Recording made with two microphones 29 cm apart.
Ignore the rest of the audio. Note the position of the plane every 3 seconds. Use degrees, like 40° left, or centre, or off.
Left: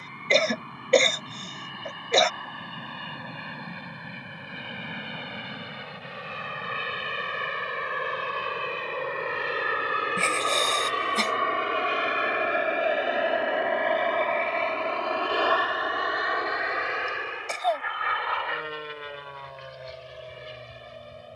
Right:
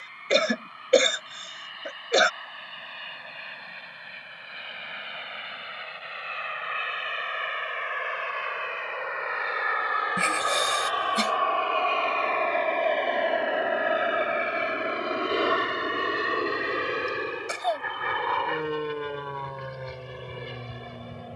70° left, 60° left, 50° left, 30° left, centre, 30° right, 50° right.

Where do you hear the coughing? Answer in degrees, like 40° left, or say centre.
10° right.